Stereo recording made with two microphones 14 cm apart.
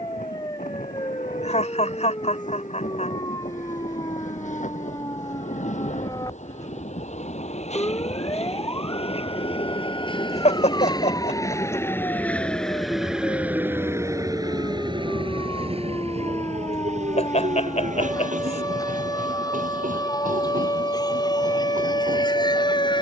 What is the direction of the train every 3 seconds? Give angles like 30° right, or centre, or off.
70° left, 60° left, 50° left, 30° left, 10° right, 50° right, 70° right, 80° right.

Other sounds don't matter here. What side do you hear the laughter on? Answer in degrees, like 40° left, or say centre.
50° left.